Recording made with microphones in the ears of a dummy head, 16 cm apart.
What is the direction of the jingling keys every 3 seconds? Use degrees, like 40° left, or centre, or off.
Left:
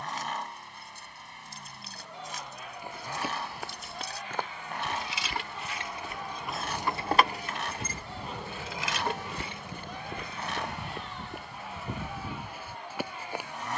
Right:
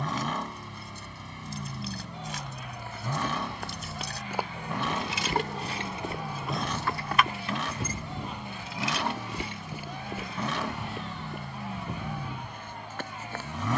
70° right, 40° right, 30° left, 70° left, off.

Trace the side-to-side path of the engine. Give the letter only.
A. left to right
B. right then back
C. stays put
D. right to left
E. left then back
C.